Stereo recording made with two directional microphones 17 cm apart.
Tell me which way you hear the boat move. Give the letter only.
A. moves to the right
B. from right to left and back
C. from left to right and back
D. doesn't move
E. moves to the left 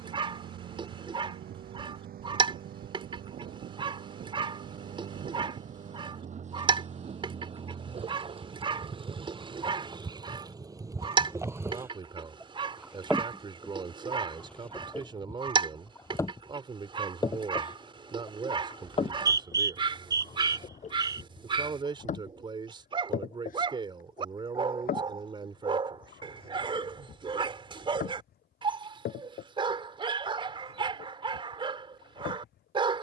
E.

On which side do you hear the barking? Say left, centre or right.
right.